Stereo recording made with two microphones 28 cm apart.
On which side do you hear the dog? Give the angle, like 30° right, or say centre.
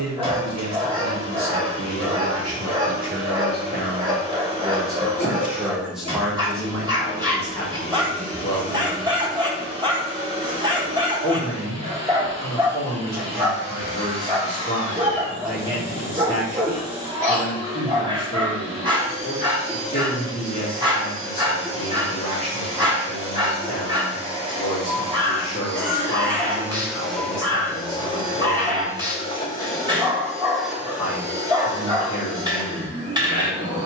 20° right.